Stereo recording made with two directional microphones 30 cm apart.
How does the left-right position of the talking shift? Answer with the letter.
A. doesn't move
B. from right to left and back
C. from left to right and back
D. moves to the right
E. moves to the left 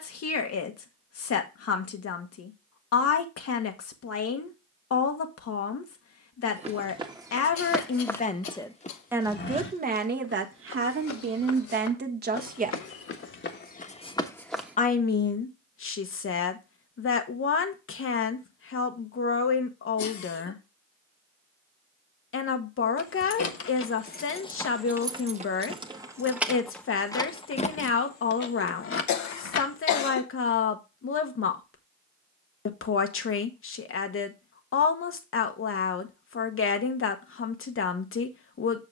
C.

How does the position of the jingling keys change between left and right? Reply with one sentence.
In this clip you hear the jingling keys go right and come back.